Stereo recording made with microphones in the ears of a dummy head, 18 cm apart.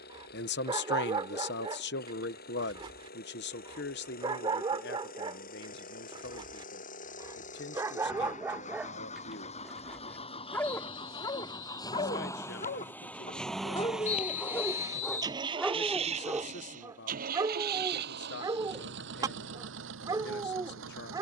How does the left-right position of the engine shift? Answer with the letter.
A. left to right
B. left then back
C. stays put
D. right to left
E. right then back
A.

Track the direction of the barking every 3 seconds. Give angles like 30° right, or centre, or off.
20° right, 20° right, 20° right, 10° left, 20° left, 10° right, 20° right.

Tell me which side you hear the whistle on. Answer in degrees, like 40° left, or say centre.
40° left.